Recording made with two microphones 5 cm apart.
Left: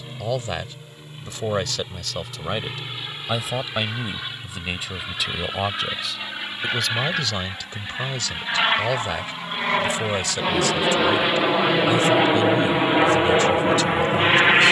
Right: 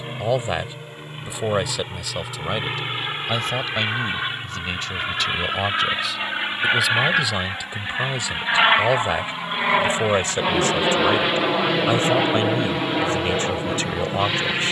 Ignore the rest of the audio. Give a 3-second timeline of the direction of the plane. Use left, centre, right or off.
right, right, right, centre, left.